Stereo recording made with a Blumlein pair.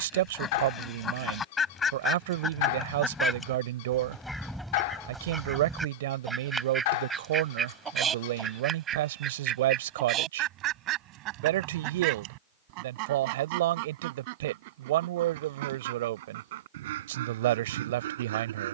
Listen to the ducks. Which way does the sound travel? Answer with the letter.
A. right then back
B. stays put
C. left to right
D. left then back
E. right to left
C.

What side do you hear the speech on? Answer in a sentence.
You can hear the speech on the right.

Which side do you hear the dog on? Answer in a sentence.
In this clip you hear the dog on the left.